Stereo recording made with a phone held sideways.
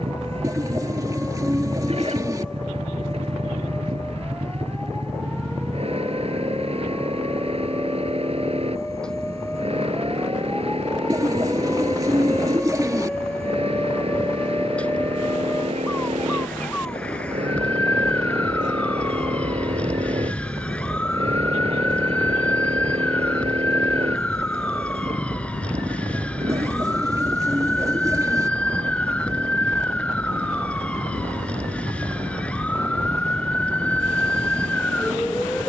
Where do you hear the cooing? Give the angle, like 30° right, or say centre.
20° right.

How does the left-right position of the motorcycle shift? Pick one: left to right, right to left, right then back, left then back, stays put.
stays put.